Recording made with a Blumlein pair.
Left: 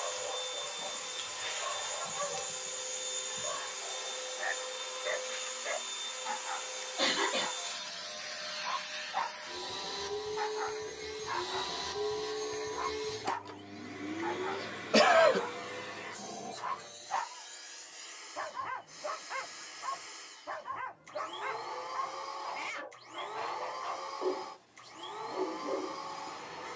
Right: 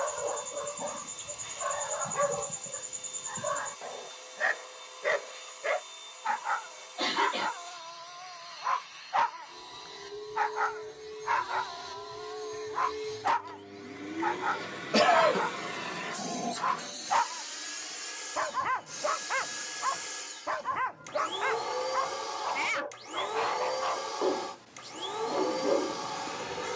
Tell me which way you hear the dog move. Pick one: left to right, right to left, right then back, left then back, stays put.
stays put.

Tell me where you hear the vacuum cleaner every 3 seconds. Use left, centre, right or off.
left, left, left, left, centre, right, right, right, right.